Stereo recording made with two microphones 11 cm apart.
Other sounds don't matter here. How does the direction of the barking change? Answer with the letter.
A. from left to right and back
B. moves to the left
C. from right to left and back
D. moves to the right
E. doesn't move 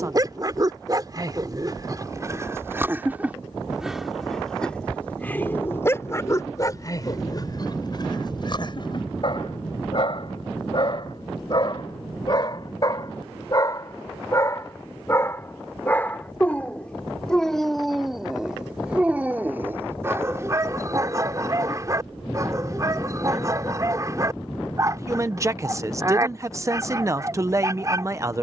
C.